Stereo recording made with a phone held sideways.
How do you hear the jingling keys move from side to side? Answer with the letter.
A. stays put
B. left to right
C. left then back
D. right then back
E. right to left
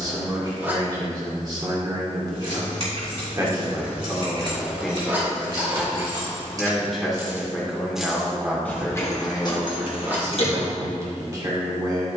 E.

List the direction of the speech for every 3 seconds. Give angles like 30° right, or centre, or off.
30° right, centre, centre, 20° right.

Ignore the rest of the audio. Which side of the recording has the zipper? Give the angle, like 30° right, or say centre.
10° right.